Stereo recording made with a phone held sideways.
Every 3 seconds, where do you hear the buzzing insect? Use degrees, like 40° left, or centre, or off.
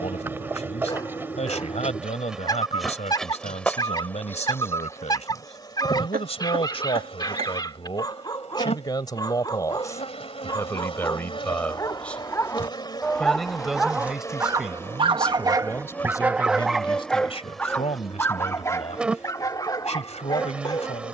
10° right, 20° left, 40° left, 40° left, 20° left, 10° left, 10° right.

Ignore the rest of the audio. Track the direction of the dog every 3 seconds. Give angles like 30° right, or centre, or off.
30° left, 30° left, 30° left, 30° left, centre, 10° right, 20° left.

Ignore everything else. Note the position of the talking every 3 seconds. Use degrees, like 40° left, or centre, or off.
50° left, 50° left, 40° left, 20° left, centre, 30° left, 50° left.